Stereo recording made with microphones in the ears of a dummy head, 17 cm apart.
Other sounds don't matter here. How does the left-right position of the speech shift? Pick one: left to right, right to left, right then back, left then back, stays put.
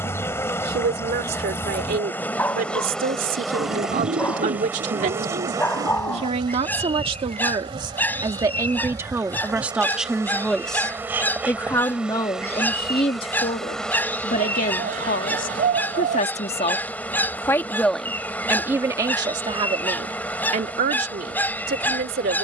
left then back.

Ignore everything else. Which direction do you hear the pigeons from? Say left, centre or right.
right.